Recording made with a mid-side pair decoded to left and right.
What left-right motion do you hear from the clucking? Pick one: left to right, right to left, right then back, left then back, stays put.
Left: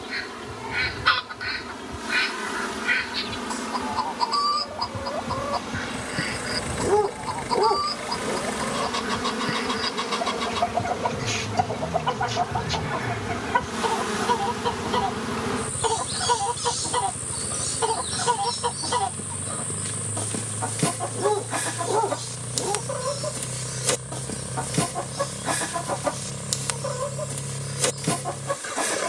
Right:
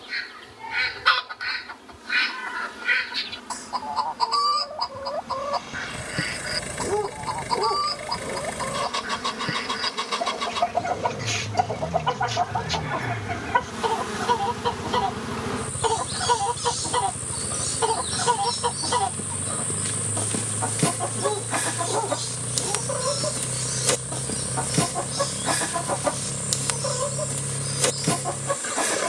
stays put.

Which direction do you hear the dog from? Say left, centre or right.
left.